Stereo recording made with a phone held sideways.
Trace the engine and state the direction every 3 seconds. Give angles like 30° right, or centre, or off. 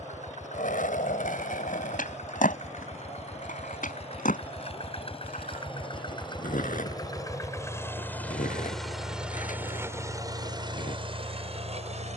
60° left, 50° left, 20° left, 30° right.